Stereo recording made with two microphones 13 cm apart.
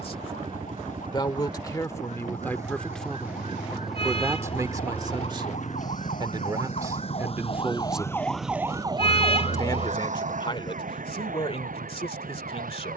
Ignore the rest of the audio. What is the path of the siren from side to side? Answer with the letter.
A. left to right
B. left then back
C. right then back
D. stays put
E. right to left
A.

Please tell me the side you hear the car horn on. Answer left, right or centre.
left.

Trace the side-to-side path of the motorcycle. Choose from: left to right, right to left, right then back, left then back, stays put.
right to left.